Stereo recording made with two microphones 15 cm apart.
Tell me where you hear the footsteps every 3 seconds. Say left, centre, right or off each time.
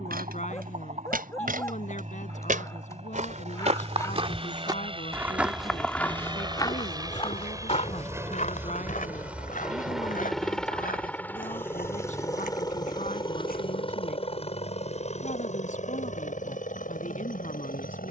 right, right, left, left, left, off.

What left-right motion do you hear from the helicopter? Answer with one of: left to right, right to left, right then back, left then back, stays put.
right to left.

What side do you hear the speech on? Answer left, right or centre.
left.